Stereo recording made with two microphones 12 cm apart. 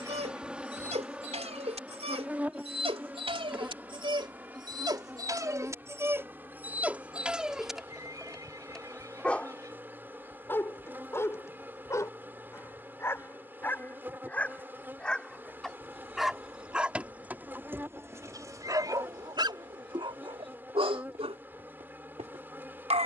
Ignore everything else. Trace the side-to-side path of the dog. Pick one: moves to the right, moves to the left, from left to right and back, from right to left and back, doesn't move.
from right to left and back.